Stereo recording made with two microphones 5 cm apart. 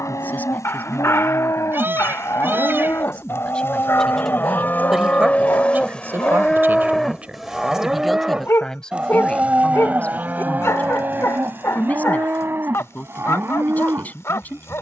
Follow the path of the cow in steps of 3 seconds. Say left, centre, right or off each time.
left, left, centre, right, right.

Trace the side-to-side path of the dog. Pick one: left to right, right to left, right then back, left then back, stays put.
stays put.